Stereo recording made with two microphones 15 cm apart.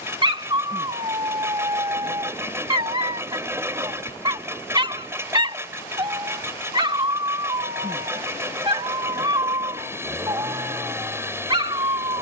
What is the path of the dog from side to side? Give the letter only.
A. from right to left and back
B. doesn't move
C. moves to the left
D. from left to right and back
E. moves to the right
B.